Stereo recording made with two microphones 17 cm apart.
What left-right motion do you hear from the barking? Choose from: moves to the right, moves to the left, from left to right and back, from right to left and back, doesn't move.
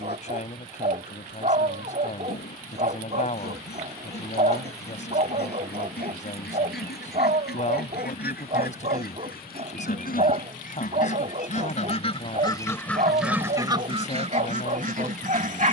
doesn't move.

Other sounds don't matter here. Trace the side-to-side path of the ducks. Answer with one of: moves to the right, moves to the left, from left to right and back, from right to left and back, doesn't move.
moves to the right.